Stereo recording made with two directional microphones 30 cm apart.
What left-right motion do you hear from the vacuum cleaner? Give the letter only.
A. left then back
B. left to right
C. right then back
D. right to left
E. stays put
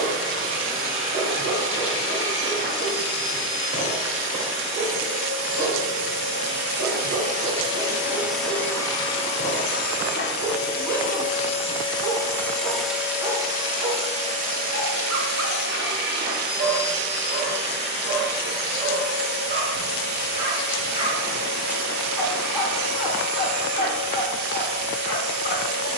A.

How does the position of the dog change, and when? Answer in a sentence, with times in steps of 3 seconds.
You can hear the dog on the right from 0 s, in the centre from 21 s and on the left from 24 s.